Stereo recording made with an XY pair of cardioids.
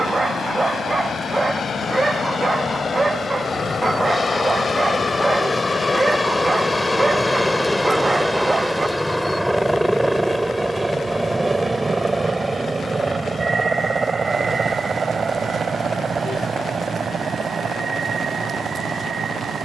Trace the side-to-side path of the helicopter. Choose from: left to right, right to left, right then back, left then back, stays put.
left to right.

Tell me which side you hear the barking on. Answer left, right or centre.
right.